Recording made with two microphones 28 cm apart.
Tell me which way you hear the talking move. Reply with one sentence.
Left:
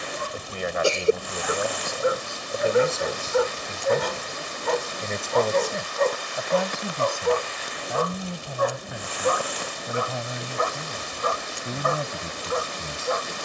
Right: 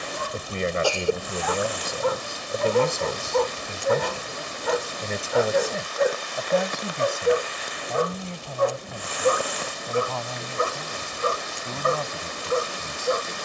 You can hear the talking move from right to left.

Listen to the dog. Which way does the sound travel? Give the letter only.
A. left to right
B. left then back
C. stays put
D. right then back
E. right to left
A.